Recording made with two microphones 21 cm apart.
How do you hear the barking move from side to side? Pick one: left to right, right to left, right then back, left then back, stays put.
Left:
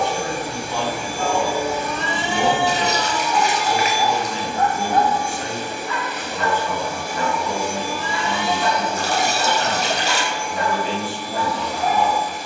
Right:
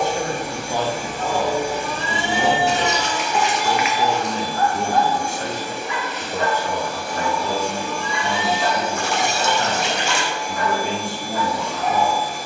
right then back.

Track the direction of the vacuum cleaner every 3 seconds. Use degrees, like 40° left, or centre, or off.
40° right, 10° left, 10° left, 40° right.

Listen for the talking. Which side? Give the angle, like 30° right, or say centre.
40° right.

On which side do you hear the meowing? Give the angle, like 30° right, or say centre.
30° right.